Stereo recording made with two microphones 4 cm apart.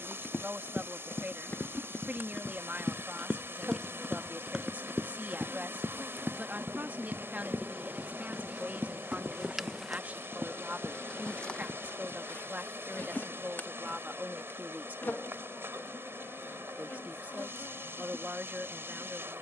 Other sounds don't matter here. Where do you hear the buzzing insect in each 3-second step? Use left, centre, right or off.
right, right, right, centre, left, left, left.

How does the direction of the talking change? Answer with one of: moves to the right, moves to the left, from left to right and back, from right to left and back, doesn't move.
doesn't move.